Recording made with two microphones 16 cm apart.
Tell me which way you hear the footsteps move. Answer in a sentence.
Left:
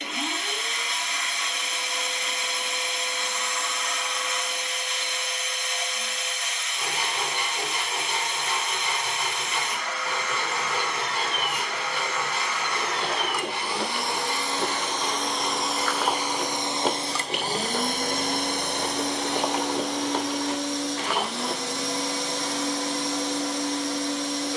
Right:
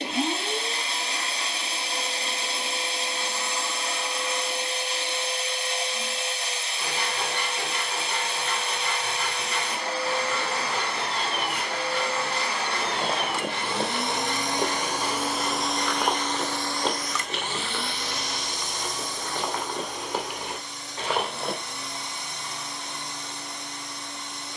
In this clip you hear the footsteps move from right to left and back again.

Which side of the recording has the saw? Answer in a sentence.
In this clip you hear the saw in the centre.